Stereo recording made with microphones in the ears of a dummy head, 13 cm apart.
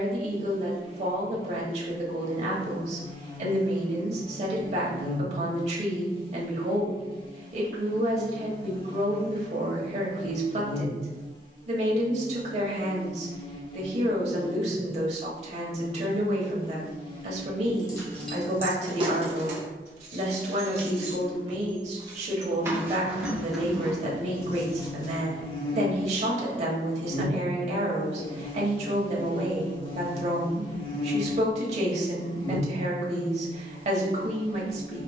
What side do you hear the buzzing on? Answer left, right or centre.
left.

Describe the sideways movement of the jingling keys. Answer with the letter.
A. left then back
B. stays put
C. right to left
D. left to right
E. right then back
E.